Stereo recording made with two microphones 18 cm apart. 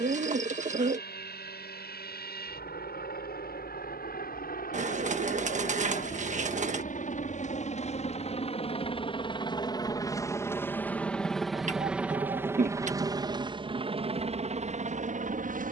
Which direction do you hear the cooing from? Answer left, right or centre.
right.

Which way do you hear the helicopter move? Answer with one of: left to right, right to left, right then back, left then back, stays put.
left to right.